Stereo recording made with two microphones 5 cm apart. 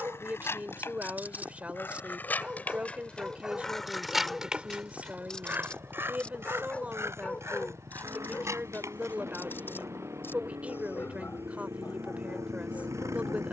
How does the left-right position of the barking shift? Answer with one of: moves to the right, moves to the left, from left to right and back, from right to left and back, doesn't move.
moves to the left.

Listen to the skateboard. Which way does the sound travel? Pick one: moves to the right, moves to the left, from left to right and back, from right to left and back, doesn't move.
moves to the right.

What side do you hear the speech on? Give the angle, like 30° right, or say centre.
30° right.